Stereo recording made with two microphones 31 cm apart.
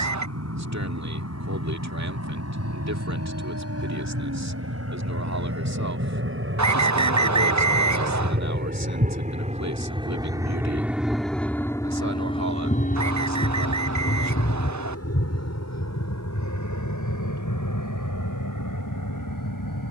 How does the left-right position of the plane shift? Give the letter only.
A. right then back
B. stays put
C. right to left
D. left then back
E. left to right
C.